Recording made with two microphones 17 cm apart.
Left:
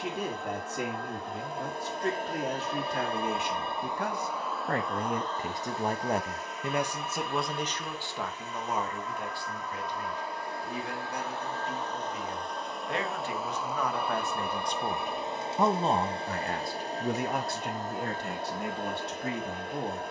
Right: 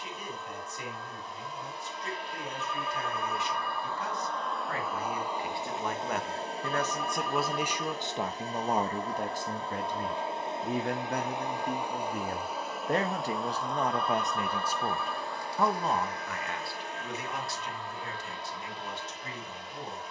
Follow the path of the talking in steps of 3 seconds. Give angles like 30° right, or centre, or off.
70° left, 60° left, 10° right, 50° right, 30° right, 40° left, 70° left.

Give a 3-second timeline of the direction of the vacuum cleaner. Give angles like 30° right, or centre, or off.
50° left, centre, 40° right, 20° right, centre, 30° left, 50° left.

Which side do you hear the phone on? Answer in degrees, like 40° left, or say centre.
20° left.